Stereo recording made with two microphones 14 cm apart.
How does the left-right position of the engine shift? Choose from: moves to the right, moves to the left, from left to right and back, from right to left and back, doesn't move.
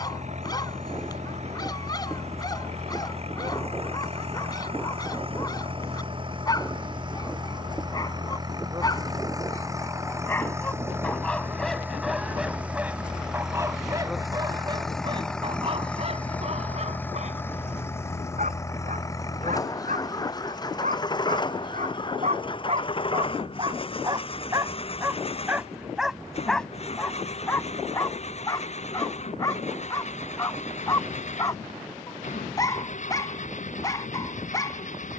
moves to the left.